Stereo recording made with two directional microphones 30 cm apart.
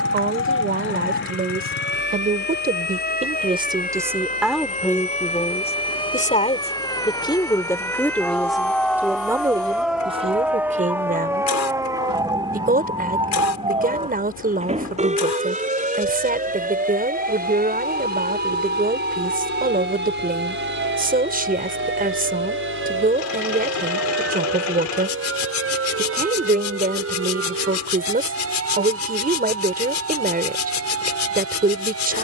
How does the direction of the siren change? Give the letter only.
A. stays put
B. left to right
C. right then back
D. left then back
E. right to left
B.